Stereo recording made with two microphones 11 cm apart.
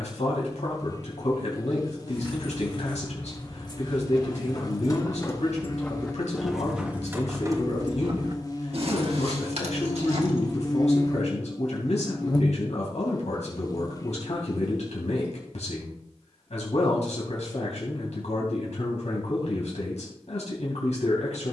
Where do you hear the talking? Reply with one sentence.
In this clip you hear the talking on the left.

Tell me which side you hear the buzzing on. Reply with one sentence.
In this clip you hear the buzzing on the left.